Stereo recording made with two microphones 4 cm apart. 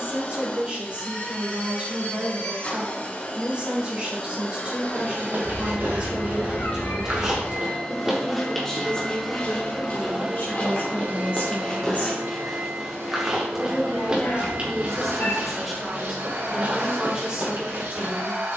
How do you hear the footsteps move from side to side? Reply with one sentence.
You can hear the footsteps move from right to left and back again.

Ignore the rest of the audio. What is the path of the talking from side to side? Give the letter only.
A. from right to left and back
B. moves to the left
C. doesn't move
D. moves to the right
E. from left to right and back
A.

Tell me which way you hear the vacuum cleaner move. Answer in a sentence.
In this clip you hear the vacuum cleaner go from the left side to the right.